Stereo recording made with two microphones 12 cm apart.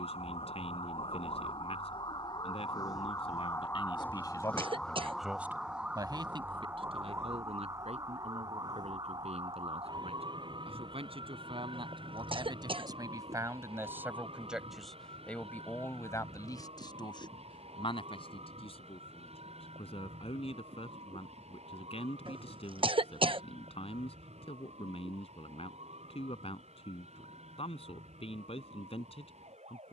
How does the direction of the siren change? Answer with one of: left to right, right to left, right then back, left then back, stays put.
left to right.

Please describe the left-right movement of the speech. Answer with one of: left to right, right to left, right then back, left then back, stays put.
right then back.